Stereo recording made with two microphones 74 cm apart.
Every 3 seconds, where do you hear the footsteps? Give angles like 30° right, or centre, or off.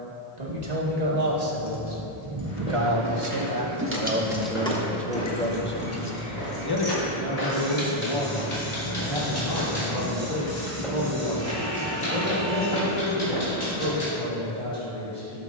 80° left, 70° left, 50° left, 10° left, 30° right.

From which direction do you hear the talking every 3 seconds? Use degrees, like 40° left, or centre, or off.
50° right, 10° right, 40° left, 60° left, 70° left.